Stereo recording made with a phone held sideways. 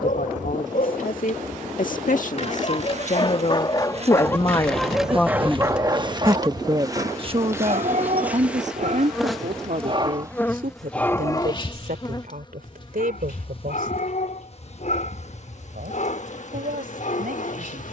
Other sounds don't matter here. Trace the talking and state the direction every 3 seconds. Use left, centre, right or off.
left, left, right, right, right, right.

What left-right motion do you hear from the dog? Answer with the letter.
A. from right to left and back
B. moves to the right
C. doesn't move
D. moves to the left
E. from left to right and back
E.